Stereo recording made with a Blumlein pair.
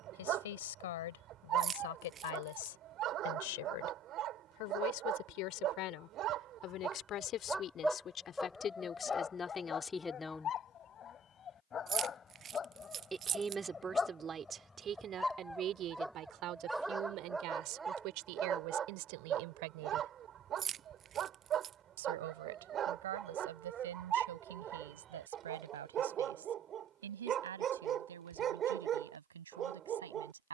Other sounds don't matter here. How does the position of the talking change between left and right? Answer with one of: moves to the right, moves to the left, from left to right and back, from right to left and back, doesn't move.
moves to the right.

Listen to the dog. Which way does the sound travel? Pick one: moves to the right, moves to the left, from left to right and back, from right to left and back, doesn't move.
from right to left and back.